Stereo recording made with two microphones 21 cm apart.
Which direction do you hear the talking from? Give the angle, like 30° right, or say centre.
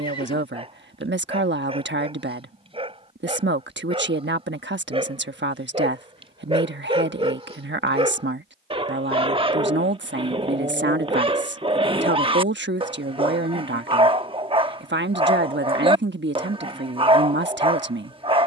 60° right.